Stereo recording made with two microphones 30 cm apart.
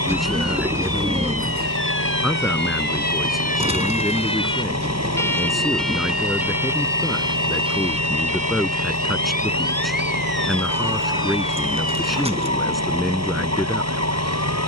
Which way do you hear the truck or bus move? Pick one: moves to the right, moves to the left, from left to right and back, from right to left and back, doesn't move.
doesn't move.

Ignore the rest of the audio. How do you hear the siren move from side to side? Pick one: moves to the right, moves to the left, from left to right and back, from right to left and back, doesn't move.
moves to the right.